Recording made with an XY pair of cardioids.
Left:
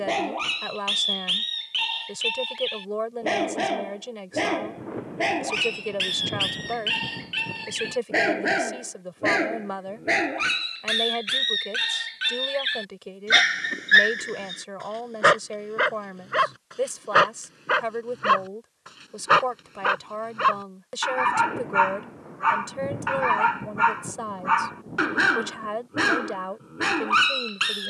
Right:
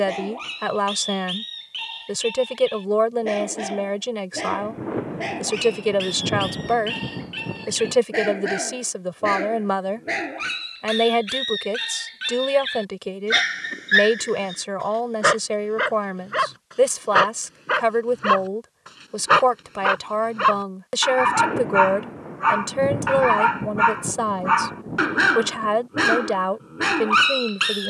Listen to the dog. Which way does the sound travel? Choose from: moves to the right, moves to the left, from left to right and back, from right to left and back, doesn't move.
moves to the right.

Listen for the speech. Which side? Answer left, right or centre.
right.